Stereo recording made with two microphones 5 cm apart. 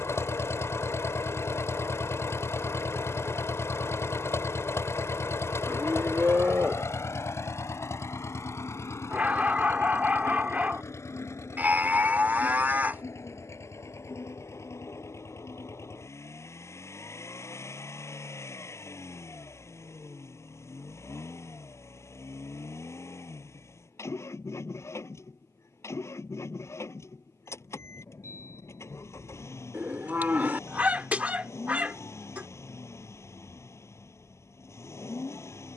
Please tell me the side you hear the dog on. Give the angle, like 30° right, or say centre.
30° right.